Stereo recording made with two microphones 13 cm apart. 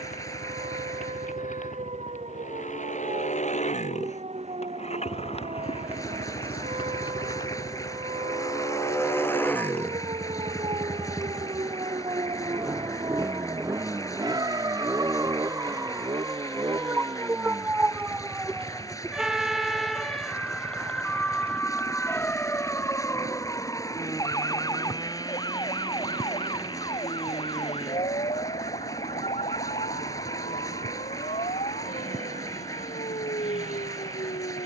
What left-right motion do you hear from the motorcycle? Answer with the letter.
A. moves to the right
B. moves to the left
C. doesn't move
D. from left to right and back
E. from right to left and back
A.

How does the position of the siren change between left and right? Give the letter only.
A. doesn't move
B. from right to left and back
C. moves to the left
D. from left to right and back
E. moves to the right
C.